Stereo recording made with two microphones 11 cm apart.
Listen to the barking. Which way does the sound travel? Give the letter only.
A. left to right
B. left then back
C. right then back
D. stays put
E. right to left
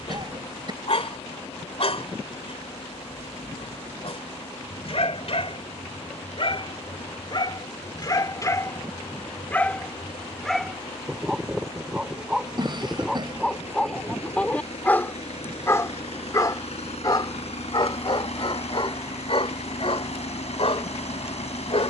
C.